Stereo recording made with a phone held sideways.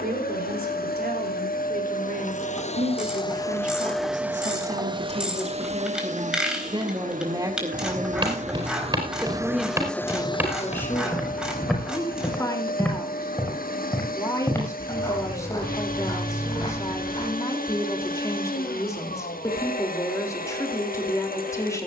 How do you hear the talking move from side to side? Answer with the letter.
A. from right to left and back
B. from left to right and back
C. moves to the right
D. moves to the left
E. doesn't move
D.